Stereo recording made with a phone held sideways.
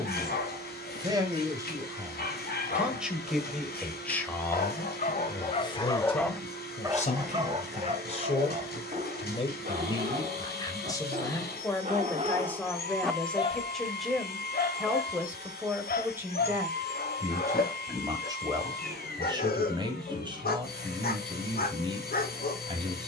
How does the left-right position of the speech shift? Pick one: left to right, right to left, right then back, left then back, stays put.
left then back.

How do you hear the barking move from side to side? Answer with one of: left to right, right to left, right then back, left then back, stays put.
right then back.